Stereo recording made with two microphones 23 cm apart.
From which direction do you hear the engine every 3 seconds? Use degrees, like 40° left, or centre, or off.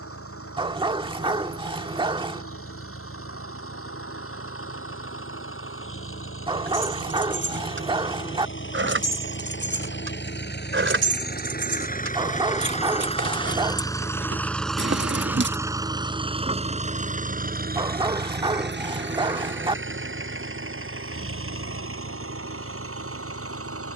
70° left, 70° left, 60° left, 50° left, 20° left, 20° right, 50° right, 70° right.